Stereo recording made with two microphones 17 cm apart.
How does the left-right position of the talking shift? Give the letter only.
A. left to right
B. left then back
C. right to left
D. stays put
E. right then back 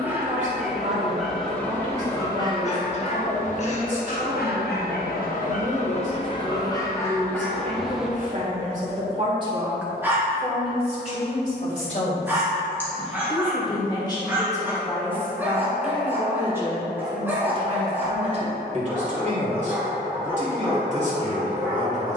B.